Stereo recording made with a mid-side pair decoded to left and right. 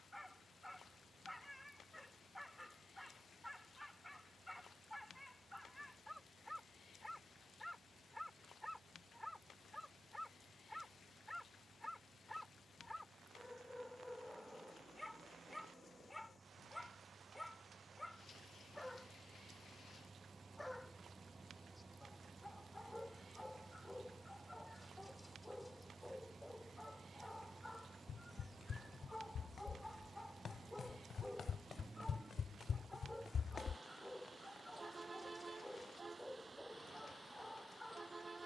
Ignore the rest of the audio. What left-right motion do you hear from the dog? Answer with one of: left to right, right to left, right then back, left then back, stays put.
stays put.